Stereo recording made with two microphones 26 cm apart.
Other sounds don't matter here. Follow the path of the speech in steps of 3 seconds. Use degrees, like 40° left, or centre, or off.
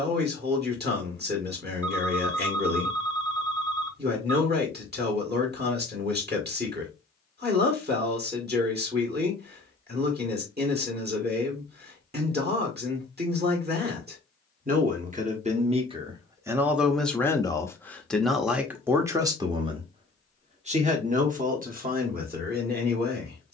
40° right, 40° right, 40° right, 40° right, 40° right, 10° right, 10° right, 30° right.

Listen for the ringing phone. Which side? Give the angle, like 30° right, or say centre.
10° left.